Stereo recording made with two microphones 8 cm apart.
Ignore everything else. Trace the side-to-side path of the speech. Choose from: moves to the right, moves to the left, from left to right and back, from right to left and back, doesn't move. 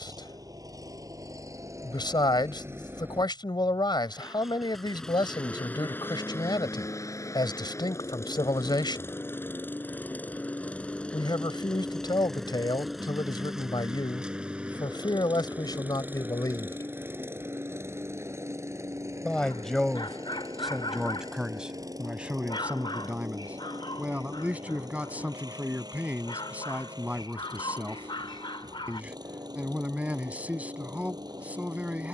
moves to the right.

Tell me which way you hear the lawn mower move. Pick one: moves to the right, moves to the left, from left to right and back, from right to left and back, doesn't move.
from right to left and back.